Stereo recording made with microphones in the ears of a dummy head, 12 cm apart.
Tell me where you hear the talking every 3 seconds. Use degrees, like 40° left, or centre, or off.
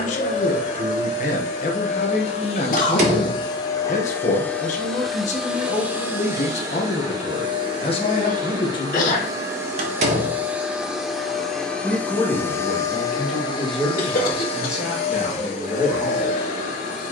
60° left, 60° left, 50° left, 20° left, centre, 10° right.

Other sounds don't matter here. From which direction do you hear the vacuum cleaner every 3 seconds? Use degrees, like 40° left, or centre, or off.
50° left, 10° left, 30° right, 10° right, 30° left, 60° left.